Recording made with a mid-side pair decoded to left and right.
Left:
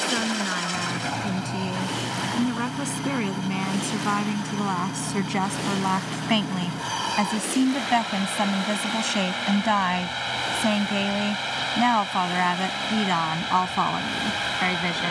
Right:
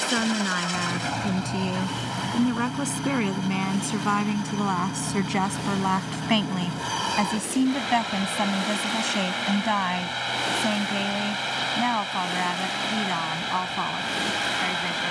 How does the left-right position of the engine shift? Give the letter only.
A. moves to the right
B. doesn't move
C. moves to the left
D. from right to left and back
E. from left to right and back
B.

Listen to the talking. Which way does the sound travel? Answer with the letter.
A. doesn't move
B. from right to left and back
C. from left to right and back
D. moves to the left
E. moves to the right
D.